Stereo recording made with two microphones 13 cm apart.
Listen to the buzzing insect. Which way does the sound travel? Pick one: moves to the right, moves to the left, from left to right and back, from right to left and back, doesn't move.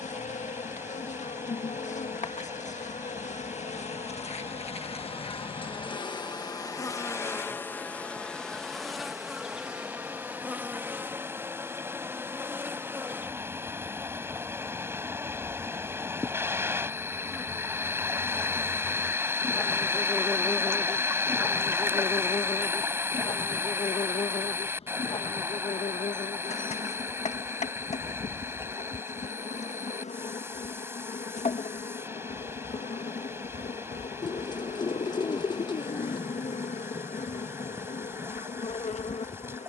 from left to right and back.